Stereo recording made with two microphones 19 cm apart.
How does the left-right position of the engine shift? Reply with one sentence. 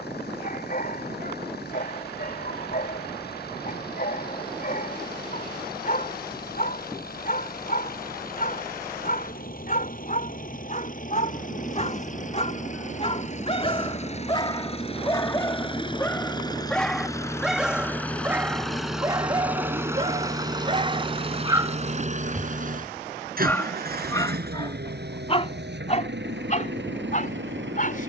You can hear the engine go from the left side to the right.